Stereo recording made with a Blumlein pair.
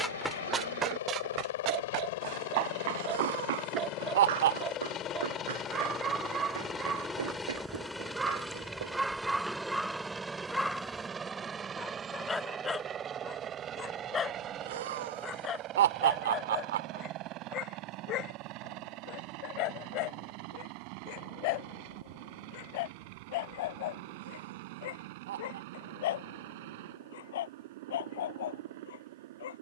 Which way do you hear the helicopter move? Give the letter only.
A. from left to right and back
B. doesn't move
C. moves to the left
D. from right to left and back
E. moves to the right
E.